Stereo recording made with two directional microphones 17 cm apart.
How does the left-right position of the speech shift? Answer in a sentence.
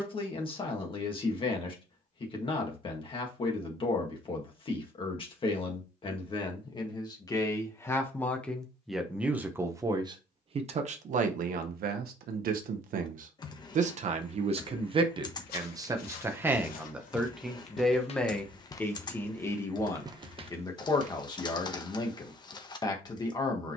You can hear the speech go right and come back.